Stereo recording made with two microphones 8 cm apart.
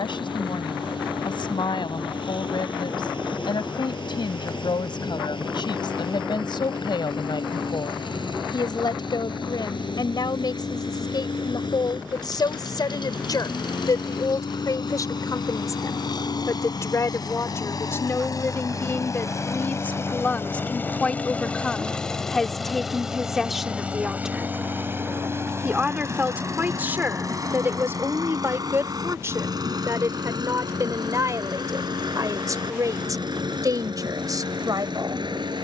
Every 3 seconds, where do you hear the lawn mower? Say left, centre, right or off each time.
left, left, left, left, left, left, left, centre, right, right, right, right.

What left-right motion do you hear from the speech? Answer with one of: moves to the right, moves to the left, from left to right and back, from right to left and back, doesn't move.
moves to the right.